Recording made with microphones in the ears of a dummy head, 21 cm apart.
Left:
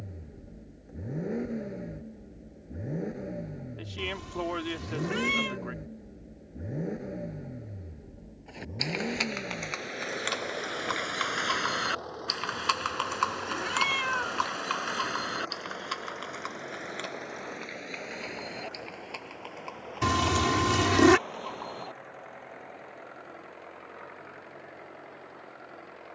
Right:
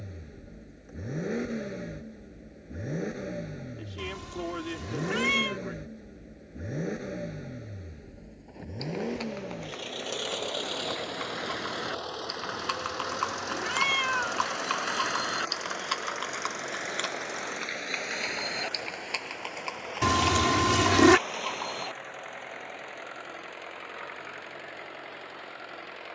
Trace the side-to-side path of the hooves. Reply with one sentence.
You can hear the hooves travel towards the right.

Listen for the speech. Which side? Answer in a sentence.
In this clip you hear the speech on the left.